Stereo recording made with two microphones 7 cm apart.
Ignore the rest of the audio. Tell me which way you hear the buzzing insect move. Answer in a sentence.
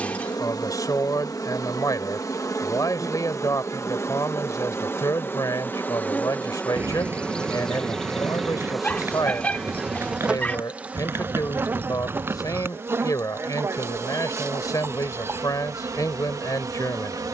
You can hear the buzzing insect move to the right.